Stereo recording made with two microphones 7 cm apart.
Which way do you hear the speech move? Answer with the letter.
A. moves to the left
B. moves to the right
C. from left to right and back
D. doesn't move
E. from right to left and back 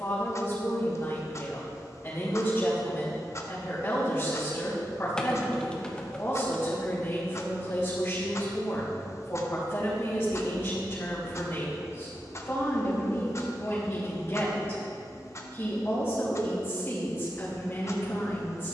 D.